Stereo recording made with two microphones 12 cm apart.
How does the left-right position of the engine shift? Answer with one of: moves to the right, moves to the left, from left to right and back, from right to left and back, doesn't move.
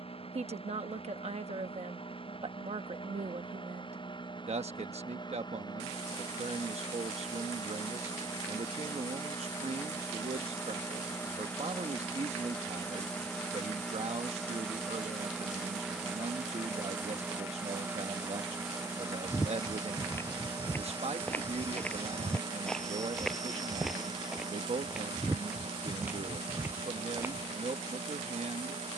moves to the right.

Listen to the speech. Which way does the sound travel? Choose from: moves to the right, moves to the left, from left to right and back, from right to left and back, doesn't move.
doesn't move.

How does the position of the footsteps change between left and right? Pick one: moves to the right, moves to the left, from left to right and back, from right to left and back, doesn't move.
moves to the right.